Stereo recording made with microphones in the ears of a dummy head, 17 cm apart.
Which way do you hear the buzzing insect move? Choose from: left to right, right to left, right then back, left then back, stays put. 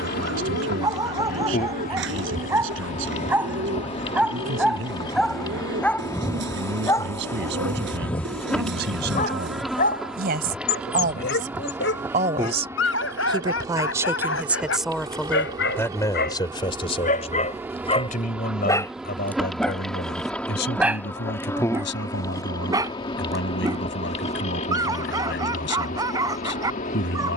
right then back.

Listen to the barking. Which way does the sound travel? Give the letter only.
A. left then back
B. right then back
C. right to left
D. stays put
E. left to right
A.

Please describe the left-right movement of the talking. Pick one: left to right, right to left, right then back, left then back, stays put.
right to left.